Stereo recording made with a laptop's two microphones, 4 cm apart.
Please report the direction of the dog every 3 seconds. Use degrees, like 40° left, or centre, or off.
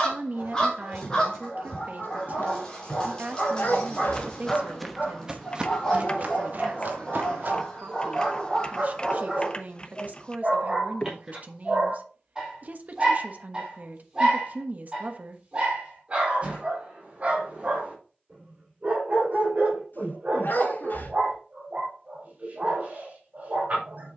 20° left, 20° left, 10° left, 10° right, 20° right, 30° right, 40° right, 40° right.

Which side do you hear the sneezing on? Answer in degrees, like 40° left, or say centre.
60° left.